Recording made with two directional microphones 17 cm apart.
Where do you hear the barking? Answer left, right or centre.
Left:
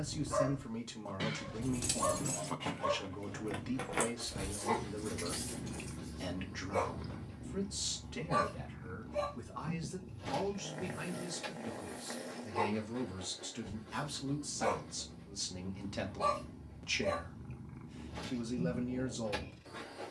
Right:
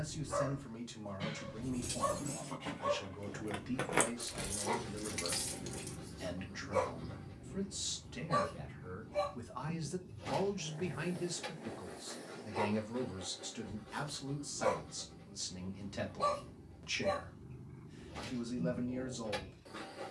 centre.